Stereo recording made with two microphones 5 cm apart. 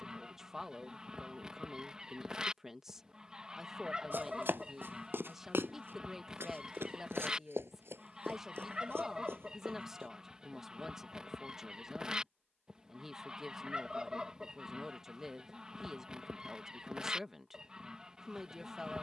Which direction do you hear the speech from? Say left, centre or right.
centre.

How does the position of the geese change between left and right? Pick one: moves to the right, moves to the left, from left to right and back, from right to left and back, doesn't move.
doesn't move.